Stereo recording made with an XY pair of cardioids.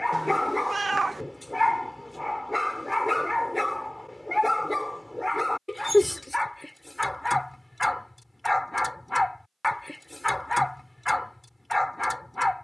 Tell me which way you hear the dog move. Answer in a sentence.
You can hear the dog stay put.